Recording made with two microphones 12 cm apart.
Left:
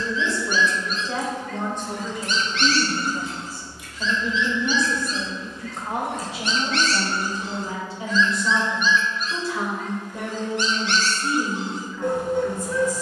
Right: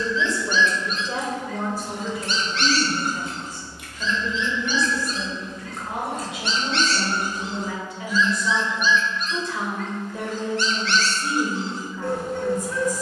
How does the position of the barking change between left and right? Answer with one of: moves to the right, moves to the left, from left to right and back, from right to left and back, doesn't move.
from left to right and back.